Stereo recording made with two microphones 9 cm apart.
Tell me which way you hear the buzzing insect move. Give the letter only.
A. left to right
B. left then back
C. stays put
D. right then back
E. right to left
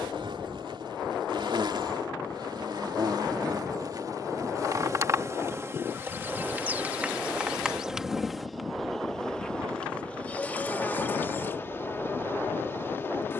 E.